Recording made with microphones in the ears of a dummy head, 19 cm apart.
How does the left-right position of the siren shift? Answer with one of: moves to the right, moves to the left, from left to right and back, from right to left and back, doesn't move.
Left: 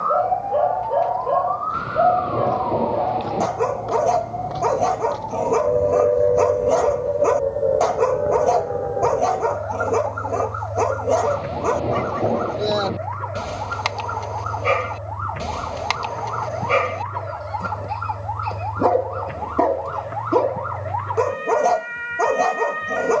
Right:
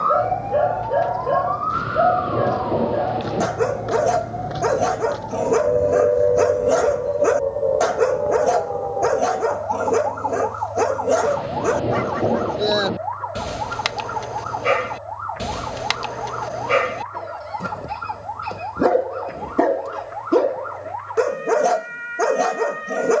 moves to the left.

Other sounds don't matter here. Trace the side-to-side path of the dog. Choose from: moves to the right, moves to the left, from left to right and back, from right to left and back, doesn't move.
doesn't move.